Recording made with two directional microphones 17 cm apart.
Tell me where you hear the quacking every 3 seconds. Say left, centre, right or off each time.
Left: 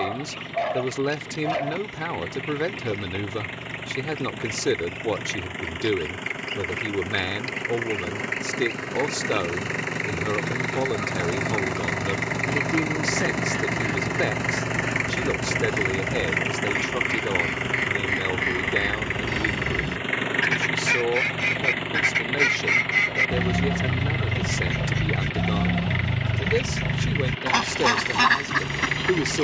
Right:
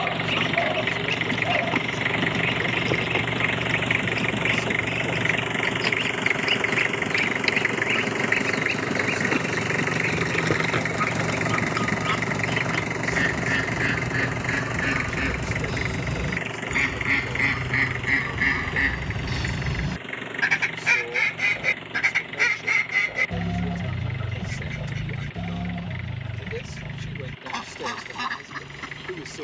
right, right, right, right, right, right, right, centre, left, left.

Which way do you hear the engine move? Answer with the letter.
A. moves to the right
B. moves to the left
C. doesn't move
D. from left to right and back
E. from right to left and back
B.